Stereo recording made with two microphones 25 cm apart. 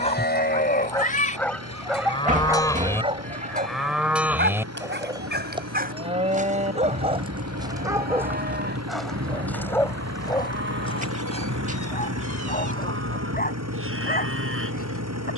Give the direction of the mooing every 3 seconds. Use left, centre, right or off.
left, centre, right, right, right.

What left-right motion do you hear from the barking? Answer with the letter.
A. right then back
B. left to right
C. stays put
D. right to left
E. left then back
A.